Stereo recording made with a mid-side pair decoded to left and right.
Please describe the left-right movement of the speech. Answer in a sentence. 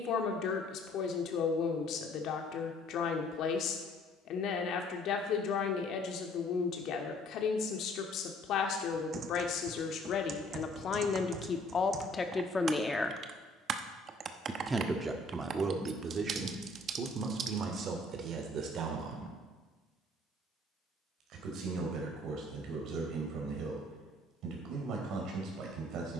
You can hear the speech go from the left side to the right.